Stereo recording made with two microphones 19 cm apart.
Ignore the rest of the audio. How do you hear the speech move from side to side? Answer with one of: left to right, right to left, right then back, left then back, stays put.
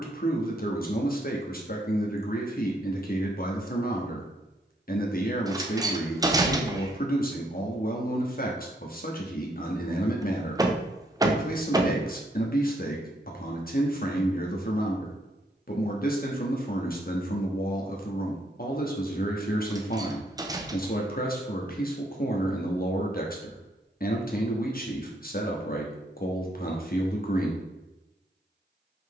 stays put.